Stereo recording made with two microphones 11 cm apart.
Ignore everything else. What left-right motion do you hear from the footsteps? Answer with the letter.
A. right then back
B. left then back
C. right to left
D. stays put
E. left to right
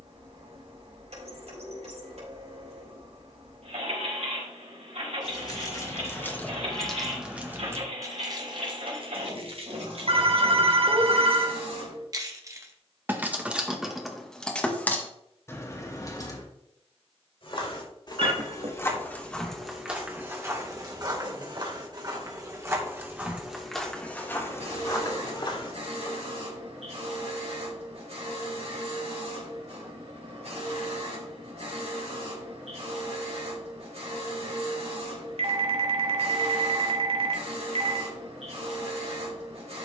A.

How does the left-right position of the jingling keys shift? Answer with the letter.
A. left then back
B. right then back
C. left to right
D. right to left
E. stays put
B.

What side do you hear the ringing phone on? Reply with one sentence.
In this clip you hear the ringing phone on the right.